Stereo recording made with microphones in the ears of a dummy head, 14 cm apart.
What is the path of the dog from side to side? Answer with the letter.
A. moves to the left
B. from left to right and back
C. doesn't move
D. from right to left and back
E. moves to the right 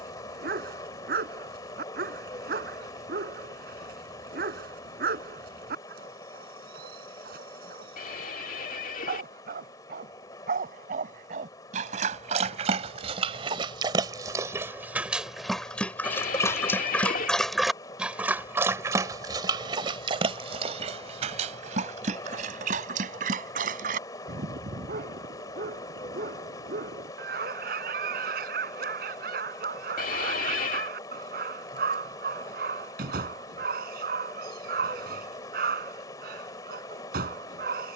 D.